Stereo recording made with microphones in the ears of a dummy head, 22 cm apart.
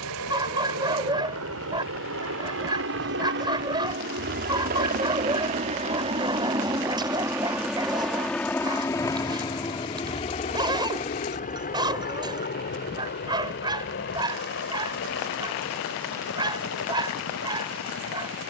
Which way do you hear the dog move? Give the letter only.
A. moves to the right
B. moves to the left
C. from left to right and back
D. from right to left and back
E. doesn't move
E.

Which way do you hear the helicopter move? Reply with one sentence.
In this clip you hear the helicopter move to the left.